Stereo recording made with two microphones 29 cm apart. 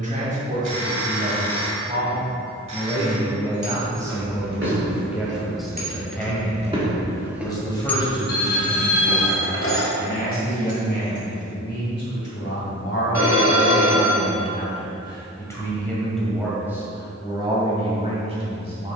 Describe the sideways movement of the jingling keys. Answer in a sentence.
You can hear the jingling keys move from right to left.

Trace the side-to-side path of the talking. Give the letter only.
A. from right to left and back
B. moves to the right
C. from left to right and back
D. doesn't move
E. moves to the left
A.